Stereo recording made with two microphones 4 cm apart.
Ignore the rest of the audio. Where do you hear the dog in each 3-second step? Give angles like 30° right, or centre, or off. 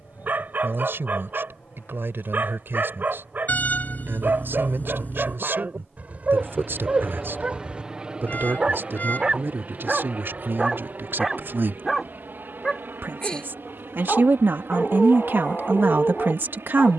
50° right, 40° right, 30° right, 10° right, 20° left, 30° left.